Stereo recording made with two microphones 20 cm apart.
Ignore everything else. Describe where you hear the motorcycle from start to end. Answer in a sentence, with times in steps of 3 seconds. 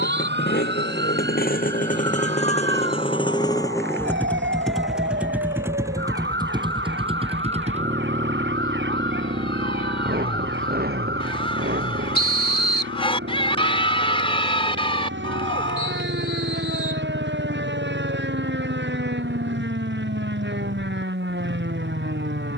In this clip you hear the motorcycle on the left from 0 s, in the centre from 3 s and on the right from 6 s.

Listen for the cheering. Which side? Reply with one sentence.
In this clip you hear the cheering on the left.